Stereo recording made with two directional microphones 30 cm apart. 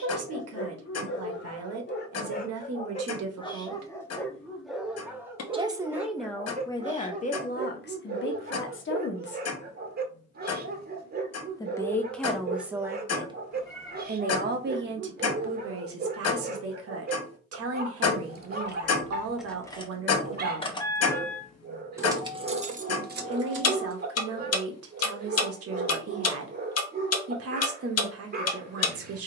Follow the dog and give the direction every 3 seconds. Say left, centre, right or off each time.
left, centre, right, right, right, right, right, right, right, right.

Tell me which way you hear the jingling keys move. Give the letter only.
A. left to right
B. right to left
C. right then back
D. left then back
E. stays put
D.